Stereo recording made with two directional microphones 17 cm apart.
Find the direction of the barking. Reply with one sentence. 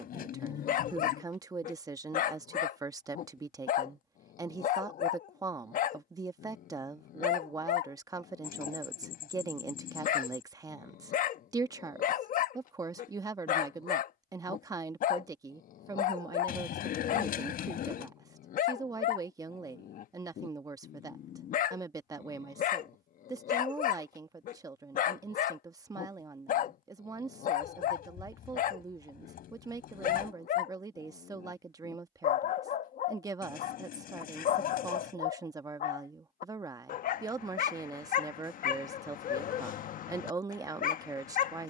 You can hear the barking on the left.